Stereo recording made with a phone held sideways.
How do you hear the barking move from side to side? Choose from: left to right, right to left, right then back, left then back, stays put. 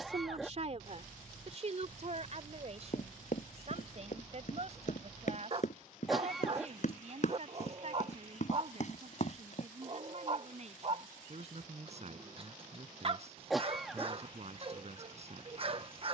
stays put.